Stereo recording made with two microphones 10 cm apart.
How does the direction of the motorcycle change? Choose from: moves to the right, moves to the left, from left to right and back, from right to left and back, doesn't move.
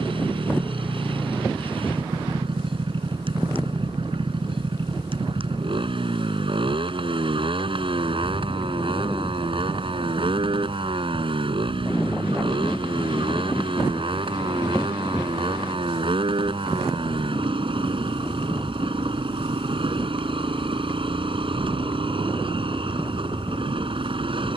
doesn't move.